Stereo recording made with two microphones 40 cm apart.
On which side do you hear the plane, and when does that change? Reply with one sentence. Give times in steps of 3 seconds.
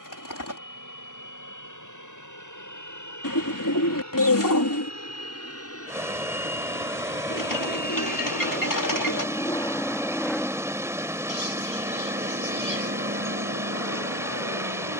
You can hear the plane on the left from 0 s, in the centre from 9 s and on the right from 12 s.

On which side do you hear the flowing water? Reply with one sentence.
You can hear the flowing water in the centre.